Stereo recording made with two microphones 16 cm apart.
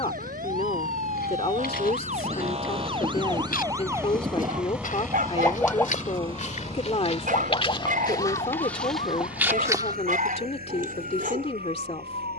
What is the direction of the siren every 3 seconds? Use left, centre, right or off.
right, centre, left, left.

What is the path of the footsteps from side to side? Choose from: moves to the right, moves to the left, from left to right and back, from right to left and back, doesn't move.
moves to the right.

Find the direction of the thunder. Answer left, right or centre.
right.